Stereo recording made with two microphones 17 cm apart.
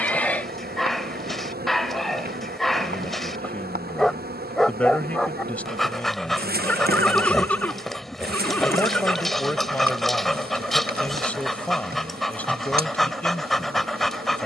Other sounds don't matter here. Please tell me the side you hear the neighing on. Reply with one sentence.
In this clip you hear the neighing in the centre.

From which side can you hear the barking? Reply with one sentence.
In this clip you hear the barking in the centre.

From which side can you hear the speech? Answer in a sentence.
You can hear the speech in the centre.